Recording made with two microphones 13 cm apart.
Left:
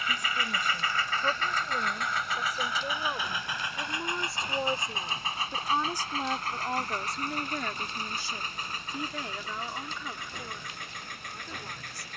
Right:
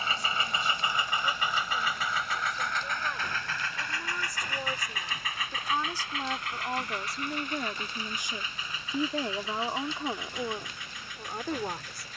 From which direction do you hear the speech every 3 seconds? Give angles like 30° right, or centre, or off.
40° left, 30° left, 10° right, 50° right.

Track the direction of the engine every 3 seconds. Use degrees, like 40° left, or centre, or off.
10° right, 20° left, 40° left, 50° left.